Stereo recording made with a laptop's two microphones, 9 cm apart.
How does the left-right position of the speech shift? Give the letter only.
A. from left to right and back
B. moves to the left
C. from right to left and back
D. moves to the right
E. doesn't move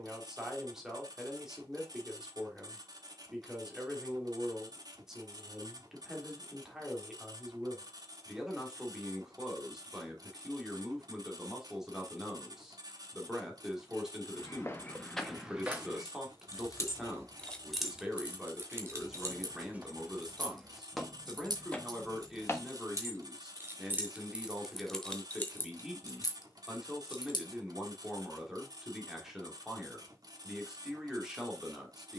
E.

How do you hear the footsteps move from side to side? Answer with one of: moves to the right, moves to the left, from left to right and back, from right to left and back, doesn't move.
from left to right and back.